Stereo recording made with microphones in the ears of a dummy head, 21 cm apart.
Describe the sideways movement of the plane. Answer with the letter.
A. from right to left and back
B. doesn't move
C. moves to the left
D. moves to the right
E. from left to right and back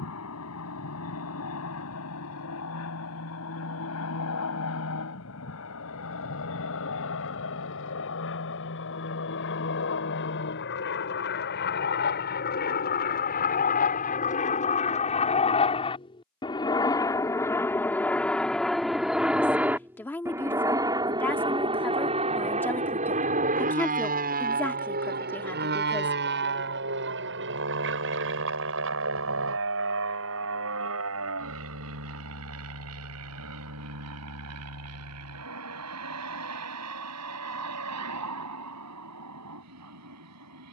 D.